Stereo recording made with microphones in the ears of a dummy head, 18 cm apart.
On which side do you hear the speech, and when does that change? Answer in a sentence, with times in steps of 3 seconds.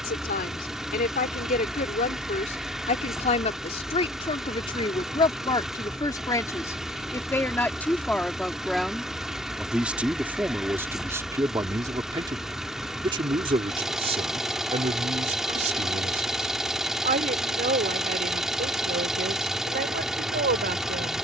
In this clip you hear the speech on the left from 0 s, in the centre from 6 s and on the right from 12 s.